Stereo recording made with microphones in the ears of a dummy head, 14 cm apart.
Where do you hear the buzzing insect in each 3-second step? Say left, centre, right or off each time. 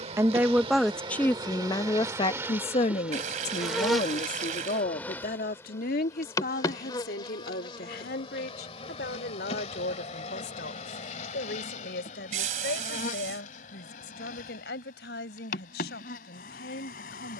right, centre, left, left, left, left.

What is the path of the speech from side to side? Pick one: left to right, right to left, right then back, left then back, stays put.
right to left.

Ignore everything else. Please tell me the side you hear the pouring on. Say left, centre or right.
right.